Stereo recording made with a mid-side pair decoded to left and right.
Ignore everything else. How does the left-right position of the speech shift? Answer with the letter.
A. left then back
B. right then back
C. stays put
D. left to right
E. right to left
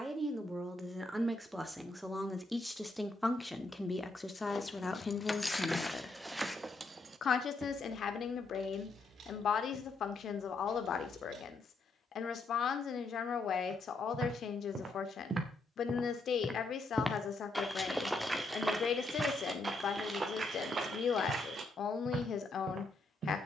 E.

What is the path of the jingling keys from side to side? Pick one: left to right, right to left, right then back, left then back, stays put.
left to right.